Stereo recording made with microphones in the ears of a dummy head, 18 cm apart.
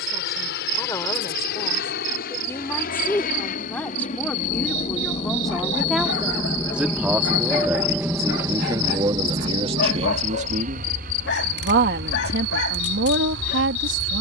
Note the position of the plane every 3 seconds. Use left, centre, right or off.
left, left, centre, right, right.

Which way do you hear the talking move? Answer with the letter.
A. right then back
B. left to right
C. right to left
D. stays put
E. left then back
B.